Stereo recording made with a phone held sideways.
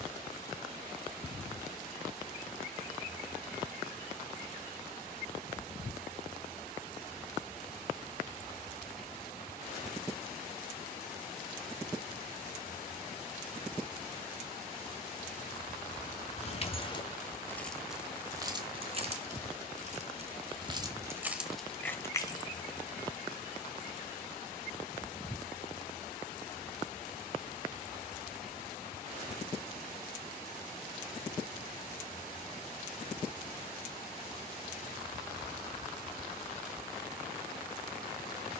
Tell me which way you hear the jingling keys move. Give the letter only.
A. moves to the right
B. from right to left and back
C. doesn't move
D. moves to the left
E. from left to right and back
E.